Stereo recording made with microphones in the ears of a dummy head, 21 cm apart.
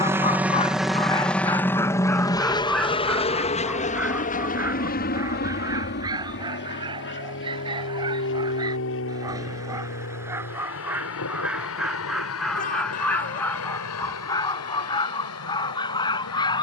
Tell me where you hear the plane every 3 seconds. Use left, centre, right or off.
centre, left, left, left, left, left.